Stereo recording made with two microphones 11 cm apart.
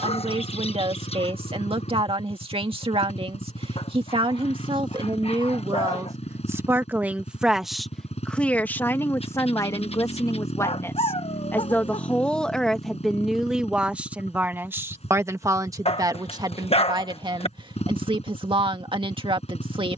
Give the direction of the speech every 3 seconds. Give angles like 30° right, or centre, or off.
50° right, 50° right, centre, 20° left, 10° right, 40° right, 50° right.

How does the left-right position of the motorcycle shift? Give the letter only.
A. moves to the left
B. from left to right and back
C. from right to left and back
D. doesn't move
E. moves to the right
D.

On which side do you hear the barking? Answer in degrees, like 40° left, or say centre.
60° left.